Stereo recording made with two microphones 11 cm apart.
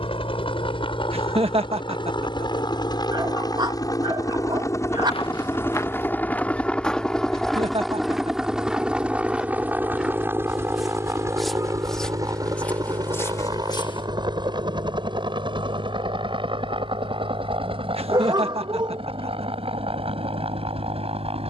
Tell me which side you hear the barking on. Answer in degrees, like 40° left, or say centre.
40° right.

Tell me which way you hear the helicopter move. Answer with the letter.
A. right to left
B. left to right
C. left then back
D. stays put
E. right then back
B.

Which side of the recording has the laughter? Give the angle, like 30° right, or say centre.
60° right.